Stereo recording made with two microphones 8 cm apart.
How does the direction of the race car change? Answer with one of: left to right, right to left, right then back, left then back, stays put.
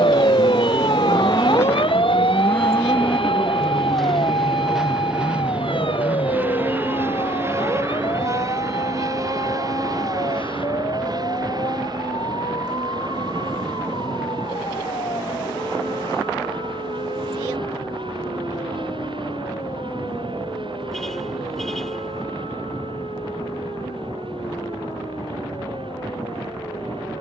left to right.